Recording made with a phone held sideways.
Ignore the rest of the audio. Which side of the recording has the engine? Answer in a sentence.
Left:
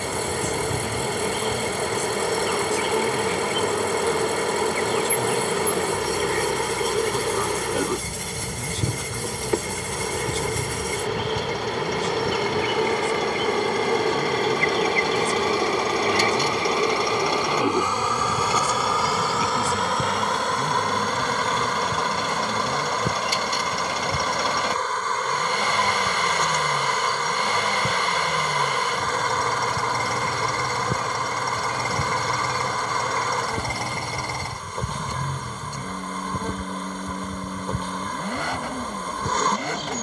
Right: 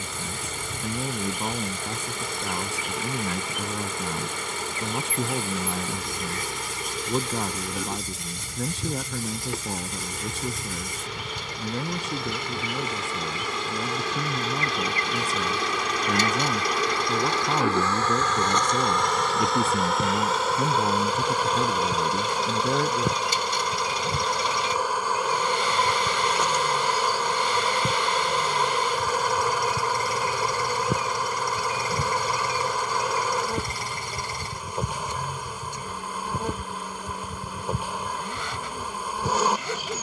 You can hear the engine on the left.